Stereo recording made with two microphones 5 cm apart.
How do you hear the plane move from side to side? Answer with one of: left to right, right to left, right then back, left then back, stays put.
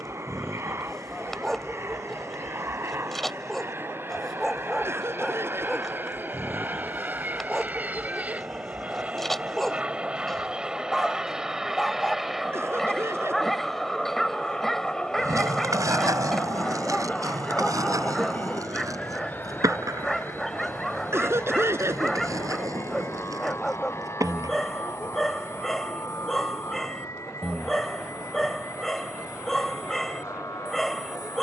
right to left.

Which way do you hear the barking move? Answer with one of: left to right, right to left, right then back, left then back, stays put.
stays put.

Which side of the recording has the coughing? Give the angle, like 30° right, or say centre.
50° right.